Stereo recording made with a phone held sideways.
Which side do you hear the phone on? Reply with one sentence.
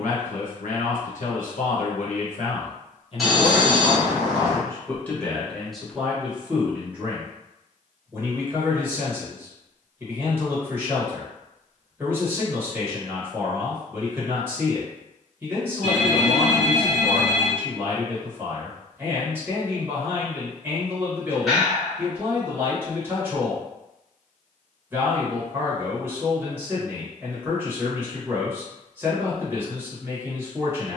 In this clip you hear the phone in the centre.